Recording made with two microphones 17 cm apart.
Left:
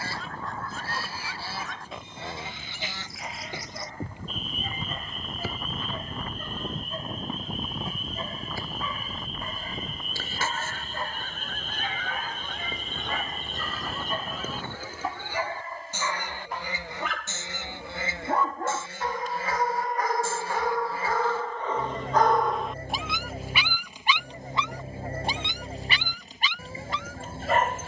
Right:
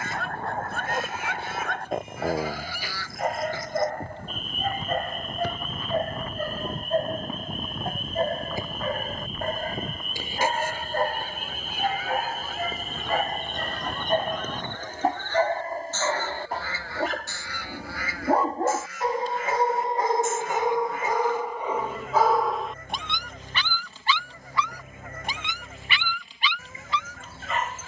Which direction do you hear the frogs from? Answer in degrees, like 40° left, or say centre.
50° right.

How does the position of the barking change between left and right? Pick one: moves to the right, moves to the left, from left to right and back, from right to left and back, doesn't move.
moves to the left.